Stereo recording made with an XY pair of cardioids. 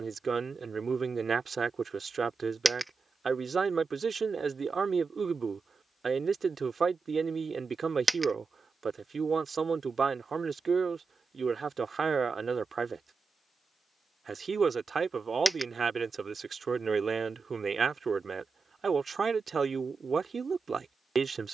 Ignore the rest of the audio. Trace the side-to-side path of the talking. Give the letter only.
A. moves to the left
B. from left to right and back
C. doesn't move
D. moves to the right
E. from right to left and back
C.